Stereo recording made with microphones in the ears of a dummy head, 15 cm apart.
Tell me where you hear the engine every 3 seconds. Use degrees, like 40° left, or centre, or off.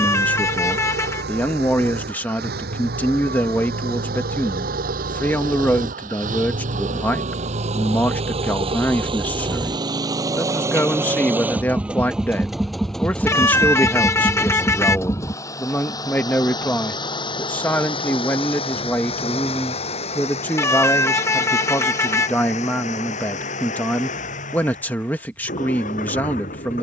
70° right, 60° right, 40° right, 20° right, 10° left, 30° left, 40° left, 50° left, 50° left.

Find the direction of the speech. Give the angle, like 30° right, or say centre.
10° left.